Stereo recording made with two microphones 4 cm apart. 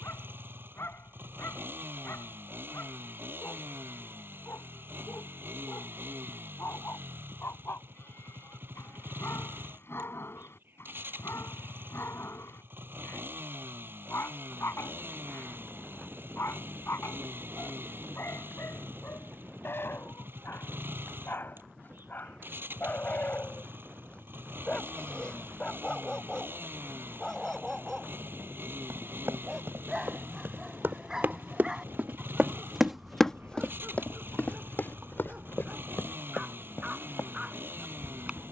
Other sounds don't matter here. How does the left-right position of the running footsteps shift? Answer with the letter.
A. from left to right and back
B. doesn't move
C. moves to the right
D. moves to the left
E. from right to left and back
D.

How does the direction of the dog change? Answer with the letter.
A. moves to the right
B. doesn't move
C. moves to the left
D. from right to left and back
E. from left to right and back
A.